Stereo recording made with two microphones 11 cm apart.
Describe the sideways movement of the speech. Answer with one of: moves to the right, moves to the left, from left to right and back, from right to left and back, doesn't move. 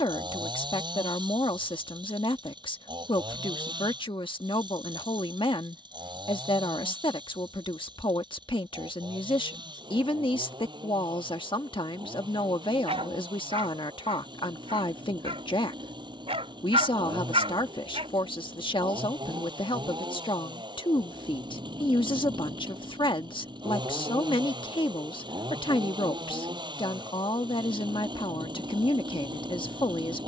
doesn't move.